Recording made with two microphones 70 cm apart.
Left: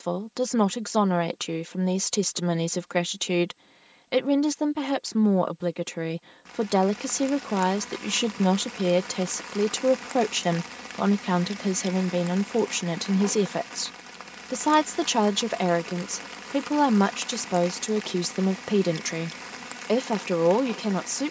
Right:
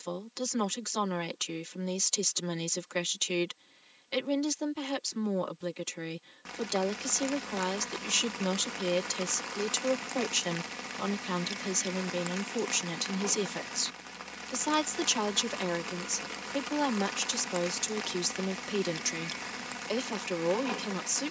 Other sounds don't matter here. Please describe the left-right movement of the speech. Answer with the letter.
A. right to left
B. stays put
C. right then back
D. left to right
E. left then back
B.